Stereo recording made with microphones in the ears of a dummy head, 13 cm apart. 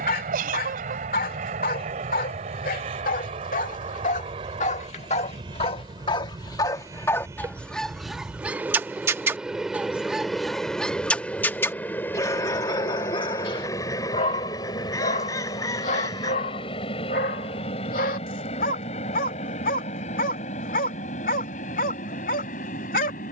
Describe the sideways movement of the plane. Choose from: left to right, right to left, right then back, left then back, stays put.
right to left.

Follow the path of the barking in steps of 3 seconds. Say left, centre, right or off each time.
left, left, centre, centre, left, left, left, left.